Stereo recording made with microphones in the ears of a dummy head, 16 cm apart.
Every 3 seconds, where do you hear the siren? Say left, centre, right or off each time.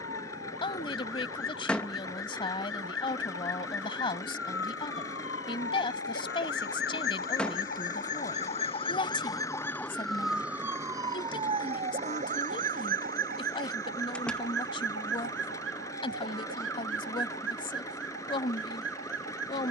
left, left, left, centre, right, right, right.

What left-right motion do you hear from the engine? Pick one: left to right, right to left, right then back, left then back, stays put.
stays put.